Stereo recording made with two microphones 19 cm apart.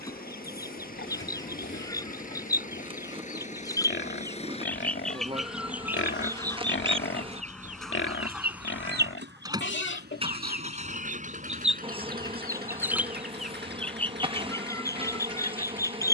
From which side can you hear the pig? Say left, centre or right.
left.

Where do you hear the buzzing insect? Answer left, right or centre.
right.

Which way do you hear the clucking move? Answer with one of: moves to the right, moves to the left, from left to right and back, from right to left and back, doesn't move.
from left to right and back.